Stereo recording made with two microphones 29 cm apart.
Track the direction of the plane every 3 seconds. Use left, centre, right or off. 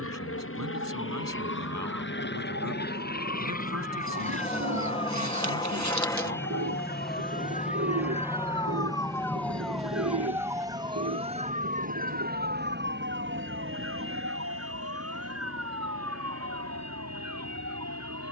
left, left, centre, right, right, right.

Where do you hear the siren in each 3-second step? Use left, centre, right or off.
left, left, left, centre, right, right.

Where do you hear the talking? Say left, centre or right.
right.